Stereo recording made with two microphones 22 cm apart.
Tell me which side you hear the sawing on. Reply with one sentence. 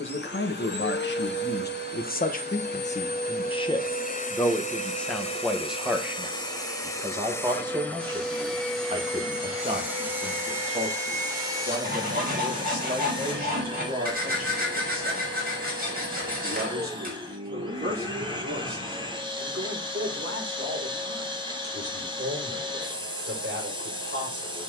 In this clip you hear the sawing on the right.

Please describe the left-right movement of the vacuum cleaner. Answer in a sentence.
You can hear the vacuum cleaner travel towards the right.